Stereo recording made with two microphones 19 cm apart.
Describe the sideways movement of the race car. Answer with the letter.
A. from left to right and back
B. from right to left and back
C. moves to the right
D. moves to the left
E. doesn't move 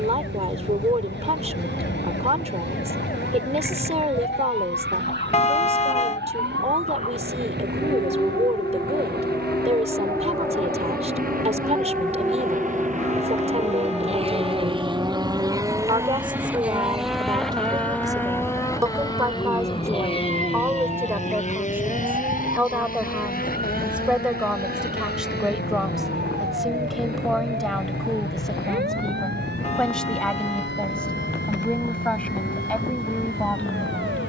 D.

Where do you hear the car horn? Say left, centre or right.
left.